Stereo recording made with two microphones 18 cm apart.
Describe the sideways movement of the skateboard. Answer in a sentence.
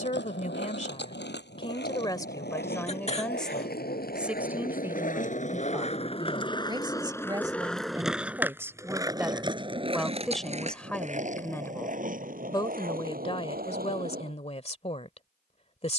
In this clip you hear the skateboard go from the left side to the right.